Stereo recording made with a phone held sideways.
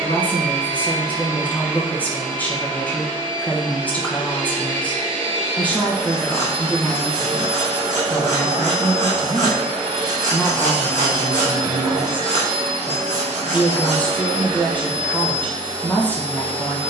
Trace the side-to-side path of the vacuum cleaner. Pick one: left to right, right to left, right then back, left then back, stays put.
stays put.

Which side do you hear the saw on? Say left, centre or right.
right.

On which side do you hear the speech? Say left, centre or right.
centre.